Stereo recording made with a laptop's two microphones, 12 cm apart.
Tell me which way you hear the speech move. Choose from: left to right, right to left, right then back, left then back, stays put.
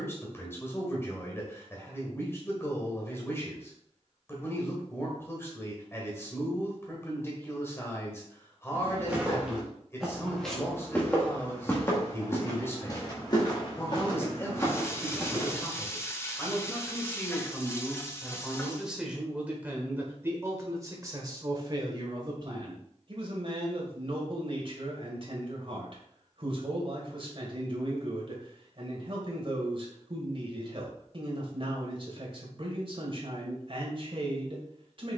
left to right.